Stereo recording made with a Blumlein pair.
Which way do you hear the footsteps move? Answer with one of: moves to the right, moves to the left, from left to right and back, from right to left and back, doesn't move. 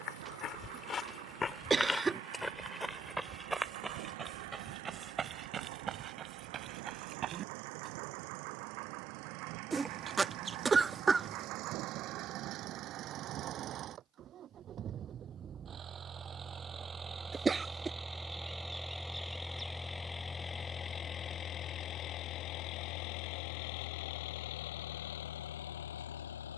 moves to the right.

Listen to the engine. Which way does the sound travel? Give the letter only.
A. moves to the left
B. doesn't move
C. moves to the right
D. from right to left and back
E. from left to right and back
A.